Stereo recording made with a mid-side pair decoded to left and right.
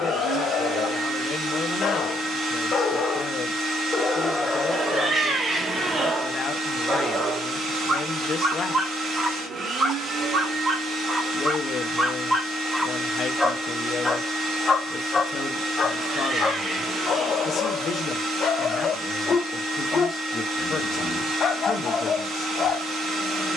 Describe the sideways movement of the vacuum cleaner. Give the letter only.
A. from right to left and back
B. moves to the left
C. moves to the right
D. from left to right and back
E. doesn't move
E.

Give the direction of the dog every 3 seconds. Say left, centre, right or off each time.
left, centre, right, right, centre, left, left, left.